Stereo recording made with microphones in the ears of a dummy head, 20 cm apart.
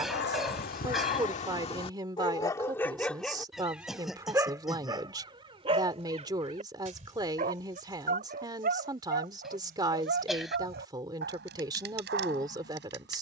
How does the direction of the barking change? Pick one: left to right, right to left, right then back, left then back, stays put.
left to right.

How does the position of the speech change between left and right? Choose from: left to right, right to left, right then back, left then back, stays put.
stays put.